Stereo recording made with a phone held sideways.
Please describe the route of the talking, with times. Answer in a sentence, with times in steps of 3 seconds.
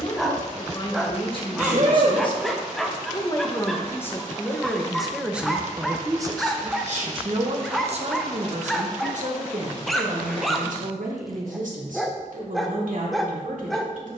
You can hear the talking on the left from 0 s, in the centre from 3 s and on the right from 6 s.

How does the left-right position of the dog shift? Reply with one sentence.
In this clip you hear the dog stay put.